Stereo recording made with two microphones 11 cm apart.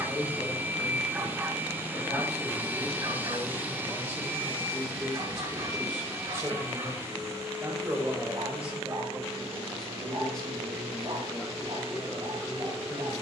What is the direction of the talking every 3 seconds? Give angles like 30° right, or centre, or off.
30° left, 10° left, 20° right, 10° left, 20° left.